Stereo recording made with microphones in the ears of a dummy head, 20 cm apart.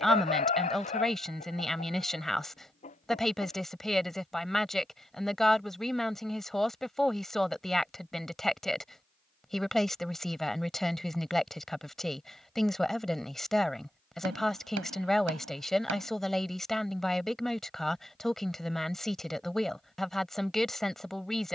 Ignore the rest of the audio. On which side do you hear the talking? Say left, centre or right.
centre.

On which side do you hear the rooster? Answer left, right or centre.
left.